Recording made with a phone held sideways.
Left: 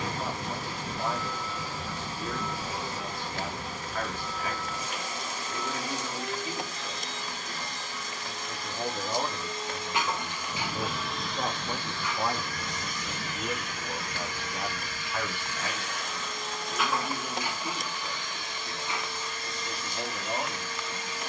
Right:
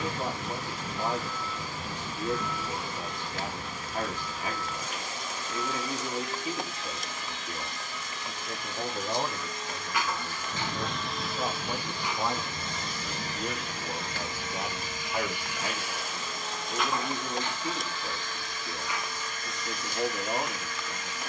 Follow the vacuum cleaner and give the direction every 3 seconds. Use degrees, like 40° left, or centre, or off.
40° left, 40° left, 40° left, 10° left, 30° right, centre, 30° left.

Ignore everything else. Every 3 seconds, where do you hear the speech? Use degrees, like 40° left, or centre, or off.
20° right, 20° right, 20° right, 10° left, centre, 20° right, 20° right.